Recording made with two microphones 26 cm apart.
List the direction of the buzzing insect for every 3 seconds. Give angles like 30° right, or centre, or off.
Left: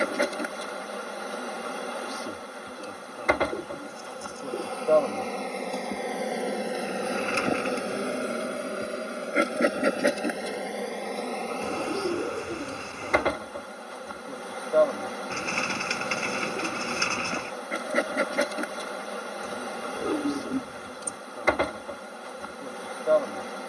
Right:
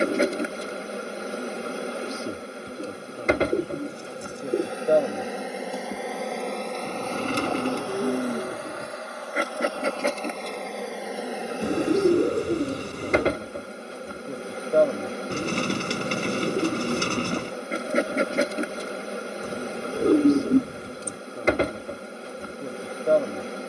30° right, 20° right, 20° left, 10° left, 30° right, 30° right, 30° right, 30° right.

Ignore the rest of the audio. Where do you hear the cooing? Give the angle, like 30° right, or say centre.
40° right.